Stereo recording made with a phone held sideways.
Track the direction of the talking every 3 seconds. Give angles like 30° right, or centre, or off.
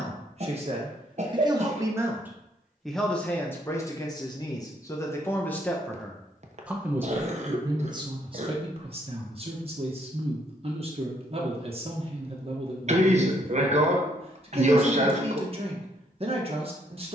30° right, 20° left, 20° right, 40° right, 40° right, 40° right.